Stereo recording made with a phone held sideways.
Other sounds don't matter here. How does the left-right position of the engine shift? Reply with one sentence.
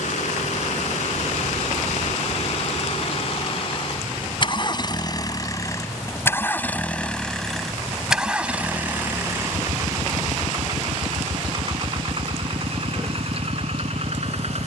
You can hear the engine travel towards the right.